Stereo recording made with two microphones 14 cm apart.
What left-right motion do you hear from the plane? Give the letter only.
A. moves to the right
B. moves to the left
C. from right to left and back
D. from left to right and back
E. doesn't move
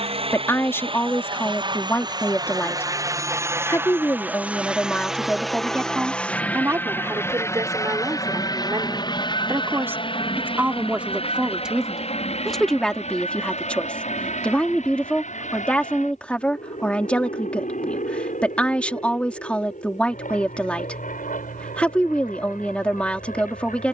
B.